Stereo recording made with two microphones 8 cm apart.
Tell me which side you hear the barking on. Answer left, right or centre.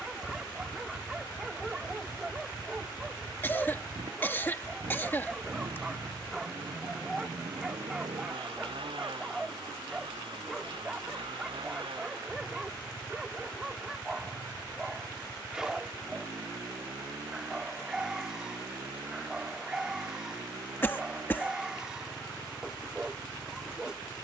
centre.